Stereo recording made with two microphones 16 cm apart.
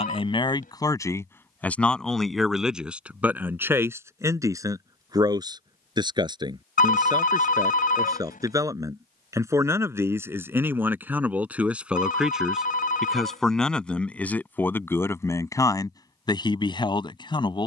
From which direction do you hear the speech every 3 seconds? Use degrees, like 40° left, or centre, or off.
10° left, 20° right, 20° right, 10° right, centre, 20° left.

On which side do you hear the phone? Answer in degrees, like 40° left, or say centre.
60° left.